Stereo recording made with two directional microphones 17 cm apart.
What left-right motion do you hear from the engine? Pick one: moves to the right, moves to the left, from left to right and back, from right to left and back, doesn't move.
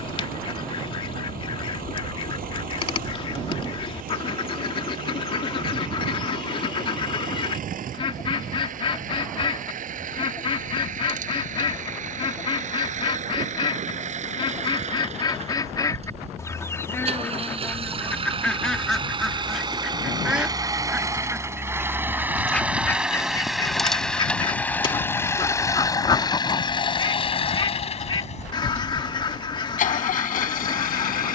moves to the left.